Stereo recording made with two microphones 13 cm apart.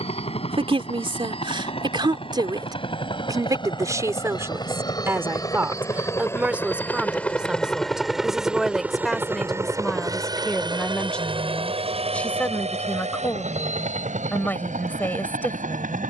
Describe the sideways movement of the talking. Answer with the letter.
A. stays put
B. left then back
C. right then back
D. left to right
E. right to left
E.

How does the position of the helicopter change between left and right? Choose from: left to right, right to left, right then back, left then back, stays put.
left to right.